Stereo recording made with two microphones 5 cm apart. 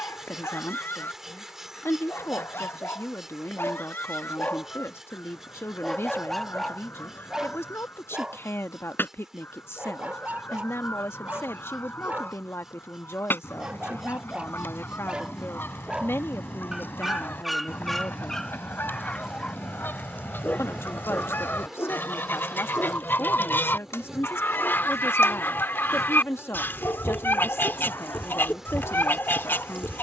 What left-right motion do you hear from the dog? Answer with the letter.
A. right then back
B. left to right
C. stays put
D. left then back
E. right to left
A.